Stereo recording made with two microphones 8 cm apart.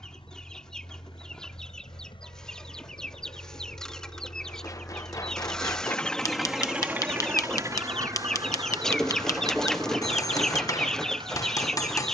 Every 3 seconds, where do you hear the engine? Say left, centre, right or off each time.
left, left, right, right.